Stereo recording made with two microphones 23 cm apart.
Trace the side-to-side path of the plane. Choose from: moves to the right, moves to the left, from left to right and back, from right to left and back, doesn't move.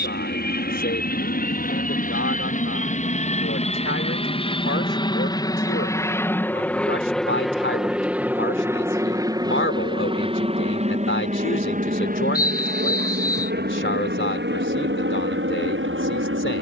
moves to the right.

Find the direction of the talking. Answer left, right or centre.
left.